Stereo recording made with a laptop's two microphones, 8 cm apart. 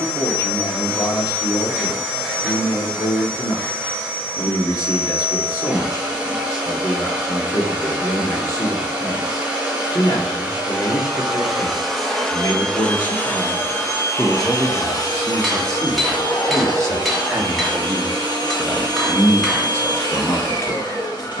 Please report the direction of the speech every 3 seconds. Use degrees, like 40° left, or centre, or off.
50° left, 50° left, 50° left, 50° left, 30° left, 40° right, 20° left.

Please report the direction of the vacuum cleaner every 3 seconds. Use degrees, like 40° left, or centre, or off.
20° right, 20° right, 20° right, 10° right, 30° left, 70° left, 80° left.